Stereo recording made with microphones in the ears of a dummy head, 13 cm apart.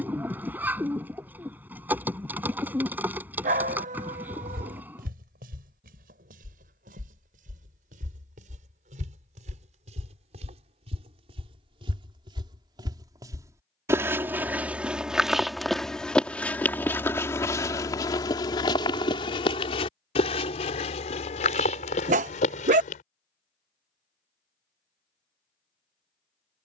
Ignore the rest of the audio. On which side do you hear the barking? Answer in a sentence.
In this clip you hear the barking on the right.